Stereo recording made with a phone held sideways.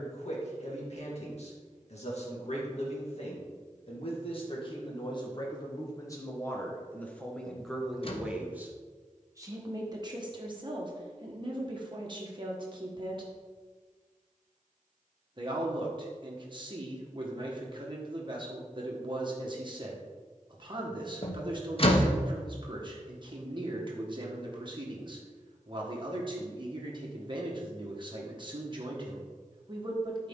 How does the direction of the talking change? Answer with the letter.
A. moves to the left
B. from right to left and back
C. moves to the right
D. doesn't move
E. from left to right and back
C.